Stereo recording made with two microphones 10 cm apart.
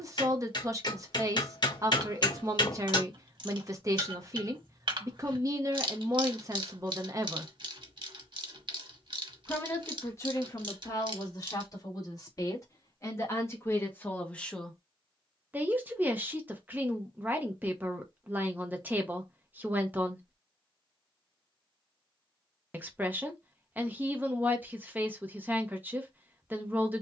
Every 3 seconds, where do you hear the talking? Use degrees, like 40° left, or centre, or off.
30° right, 30° right, 30° right, 30° left, 30° left, 20° right, 20° right, 20° right, 20° right.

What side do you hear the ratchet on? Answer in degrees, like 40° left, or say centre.
60° right.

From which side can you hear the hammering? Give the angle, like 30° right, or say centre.
50° left.